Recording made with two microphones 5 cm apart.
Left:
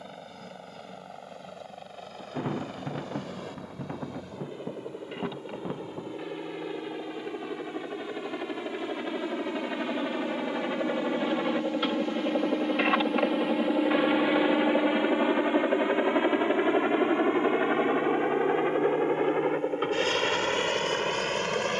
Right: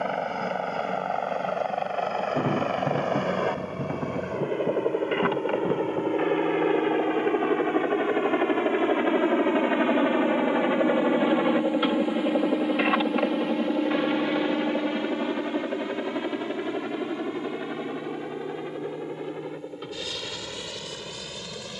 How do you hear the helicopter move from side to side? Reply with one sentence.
In this clip you hear the helicopter move to the left.